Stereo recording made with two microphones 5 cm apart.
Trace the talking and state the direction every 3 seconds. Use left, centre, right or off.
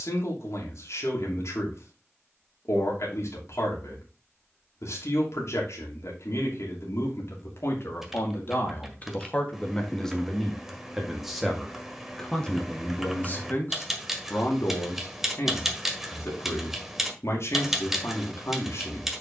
left, left, left, centre, left, left, left.